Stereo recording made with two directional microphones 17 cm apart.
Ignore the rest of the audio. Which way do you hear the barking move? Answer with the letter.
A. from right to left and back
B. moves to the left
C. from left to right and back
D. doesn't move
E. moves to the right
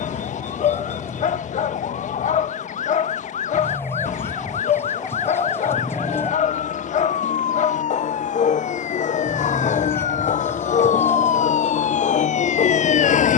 D.